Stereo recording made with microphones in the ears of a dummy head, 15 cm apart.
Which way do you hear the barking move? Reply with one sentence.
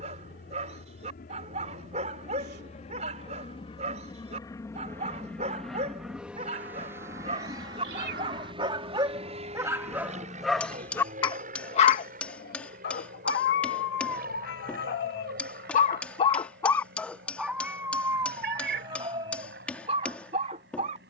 You can hear the barking go left and come back.